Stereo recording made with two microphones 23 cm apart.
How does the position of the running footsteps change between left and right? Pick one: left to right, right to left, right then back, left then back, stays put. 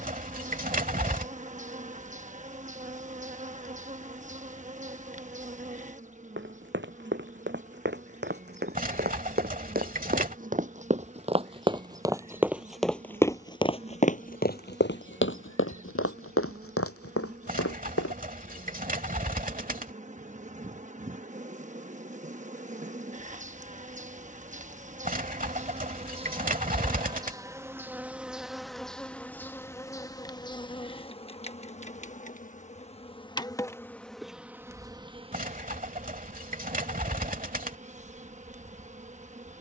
right to left.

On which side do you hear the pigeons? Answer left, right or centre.
right.